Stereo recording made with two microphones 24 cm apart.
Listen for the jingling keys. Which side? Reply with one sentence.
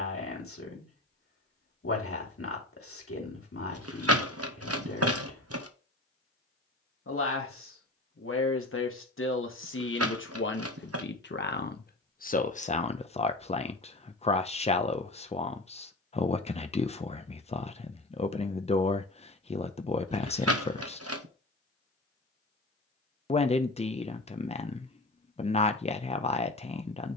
You can hear the jingling keys on the right.